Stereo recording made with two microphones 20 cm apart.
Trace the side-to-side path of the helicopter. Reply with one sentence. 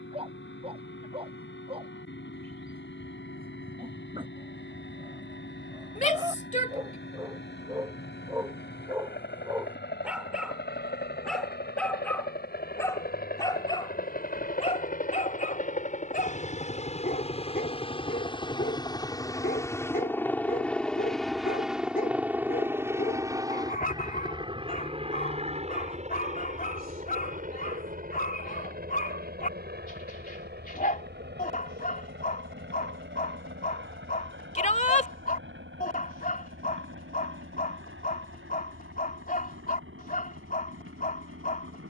In this clip you hear the helicopter go from the left side to the right.